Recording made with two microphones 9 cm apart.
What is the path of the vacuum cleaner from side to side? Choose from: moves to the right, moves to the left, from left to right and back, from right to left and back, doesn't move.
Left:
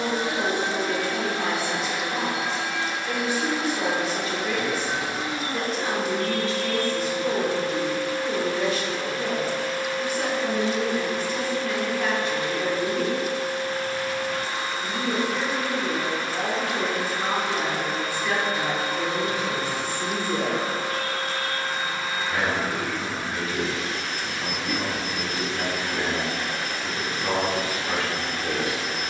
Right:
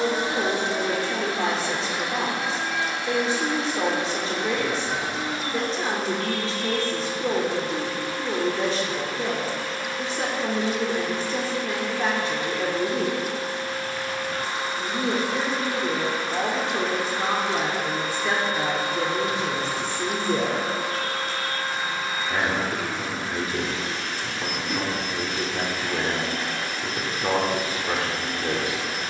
moves to the left.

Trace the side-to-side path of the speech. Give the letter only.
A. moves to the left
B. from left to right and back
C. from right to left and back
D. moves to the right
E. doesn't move
E.